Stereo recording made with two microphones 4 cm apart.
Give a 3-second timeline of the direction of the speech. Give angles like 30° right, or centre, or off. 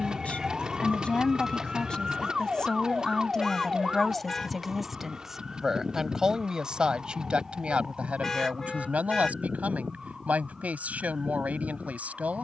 20° left, centre, 20° right, 40° right.